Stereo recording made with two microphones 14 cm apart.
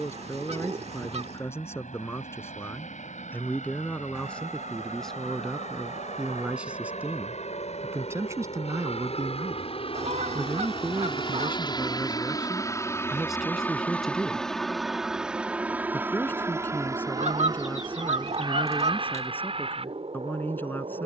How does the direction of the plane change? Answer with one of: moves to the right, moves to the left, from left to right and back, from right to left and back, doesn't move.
moves to the right.